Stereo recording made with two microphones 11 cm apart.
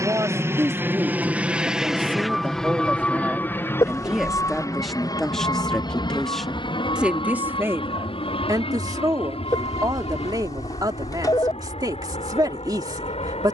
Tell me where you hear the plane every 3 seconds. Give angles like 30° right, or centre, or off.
10° right, 30° left, 50° left, 60° left, 70° left.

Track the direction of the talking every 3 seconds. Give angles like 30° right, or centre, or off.
20° right, centre, 20° right, 40° right, 40° right.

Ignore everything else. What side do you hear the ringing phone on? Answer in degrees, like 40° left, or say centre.
40° left.